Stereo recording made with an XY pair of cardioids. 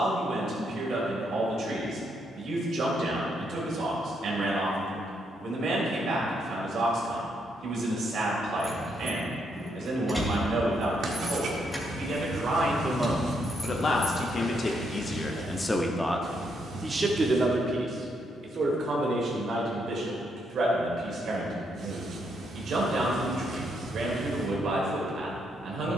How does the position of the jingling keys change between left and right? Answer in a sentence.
In this clip you hear the jingling keys move from right to left.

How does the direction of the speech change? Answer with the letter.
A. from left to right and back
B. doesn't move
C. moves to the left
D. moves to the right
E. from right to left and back
E.